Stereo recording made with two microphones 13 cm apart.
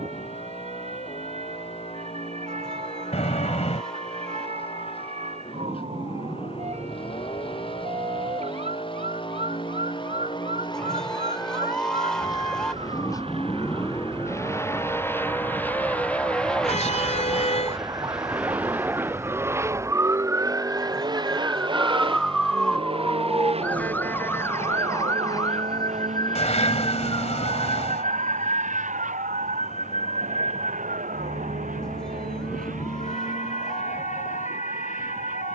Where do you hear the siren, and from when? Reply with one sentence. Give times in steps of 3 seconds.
You can hear the siren on the right from 0 s, in the centre from 21 s and on the left from 24 s.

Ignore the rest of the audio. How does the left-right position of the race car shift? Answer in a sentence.
In this clip you hear the race car travel towards the right.